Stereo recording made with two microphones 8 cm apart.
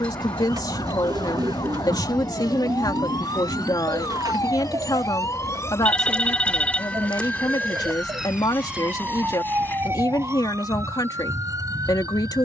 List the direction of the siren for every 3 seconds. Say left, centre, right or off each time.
left, left, centre, right.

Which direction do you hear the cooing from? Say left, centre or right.
right.